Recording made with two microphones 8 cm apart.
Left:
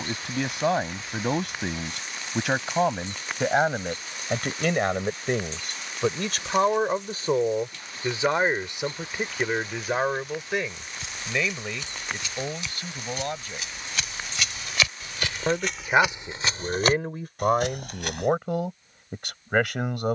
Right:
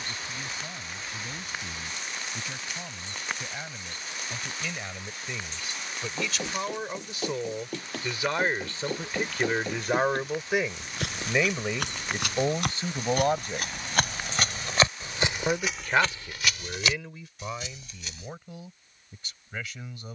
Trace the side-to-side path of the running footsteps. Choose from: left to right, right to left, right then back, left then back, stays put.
right to left.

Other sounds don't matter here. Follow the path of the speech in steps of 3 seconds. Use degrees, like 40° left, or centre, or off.
80° left, 70° left, 40° left, centre, 20° right, 40° left, 70° left.